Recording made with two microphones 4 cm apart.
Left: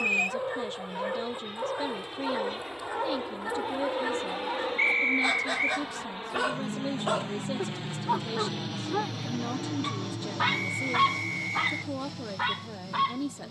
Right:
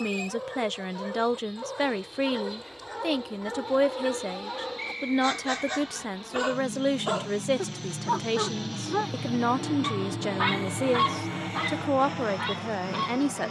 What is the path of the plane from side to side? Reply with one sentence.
In this clip you hear the plane move from left to right.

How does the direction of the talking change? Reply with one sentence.
You can hear the talking stay put.